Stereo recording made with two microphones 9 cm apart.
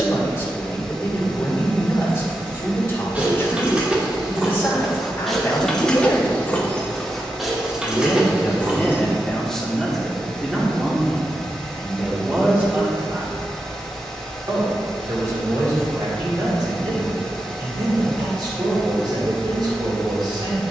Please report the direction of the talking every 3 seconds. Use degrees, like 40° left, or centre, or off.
30° left, 30° left, 20° left, centre, 30° right, 50° right, 60° right.